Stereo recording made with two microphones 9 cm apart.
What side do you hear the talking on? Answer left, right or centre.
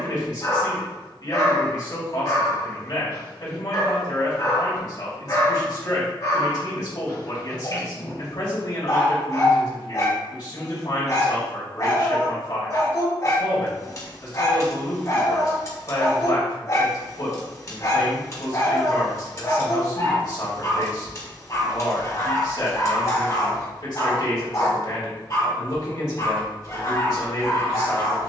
left.